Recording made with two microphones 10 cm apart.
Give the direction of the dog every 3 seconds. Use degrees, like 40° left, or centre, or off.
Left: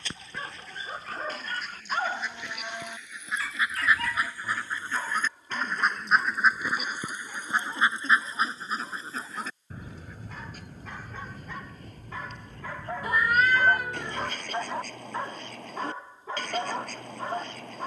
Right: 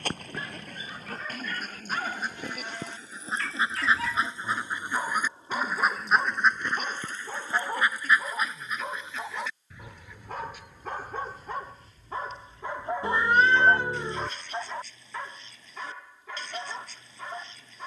40° left, 20° right, 50° right, 50° right, 10° right, 30° left.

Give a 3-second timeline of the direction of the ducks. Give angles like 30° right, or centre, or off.
50° right, 20° right, 20° left, 50° left, 60° left, 60° left.